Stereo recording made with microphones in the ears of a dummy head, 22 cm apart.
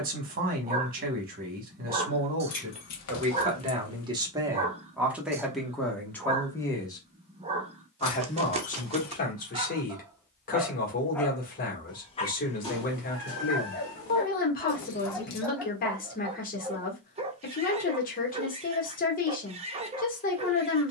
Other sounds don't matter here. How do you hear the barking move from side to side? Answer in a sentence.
You can hear the barking move from right to left and back again.